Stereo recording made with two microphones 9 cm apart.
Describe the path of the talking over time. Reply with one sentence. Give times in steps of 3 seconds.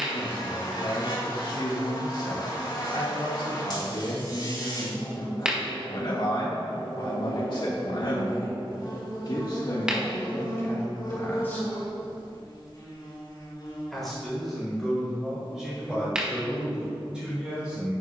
You can hear the talking on the left from 0 s and in the centre from 12 s.